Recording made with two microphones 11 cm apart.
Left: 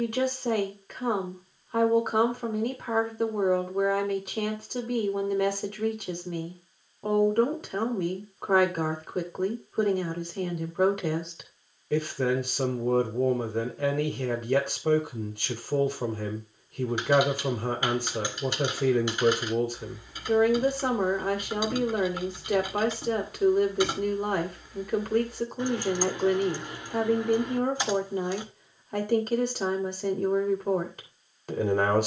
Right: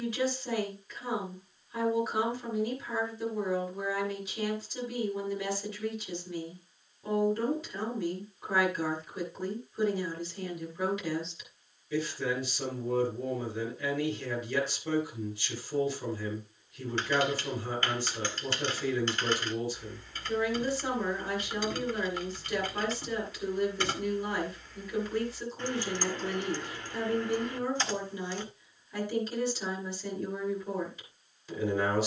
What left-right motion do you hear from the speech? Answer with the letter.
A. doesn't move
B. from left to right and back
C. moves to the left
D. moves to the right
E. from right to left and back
A.